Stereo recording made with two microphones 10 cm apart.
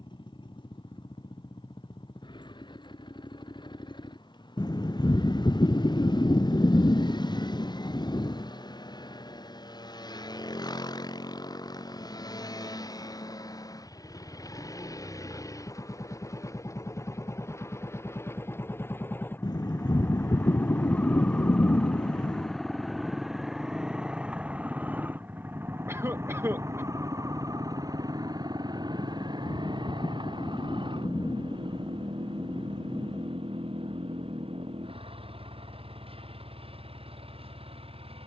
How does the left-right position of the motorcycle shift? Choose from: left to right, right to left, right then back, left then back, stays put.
left to right.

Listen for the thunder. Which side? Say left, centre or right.
left.